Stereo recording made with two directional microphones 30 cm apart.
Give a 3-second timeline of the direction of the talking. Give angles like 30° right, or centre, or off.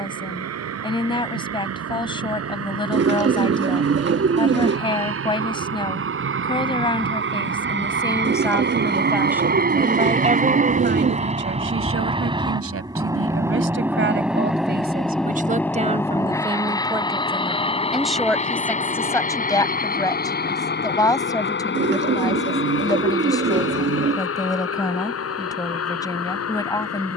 20° left, 20° left, 10° left, 30° right, 40° right, 20° right, 10° left, 10° left, 10° left.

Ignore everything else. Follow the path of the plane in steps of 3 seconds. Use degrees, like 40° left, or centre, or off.
60° right, 50° right, 40° right, 30° right, 10° right, 10° left, 30° left, 40° left, 50° left.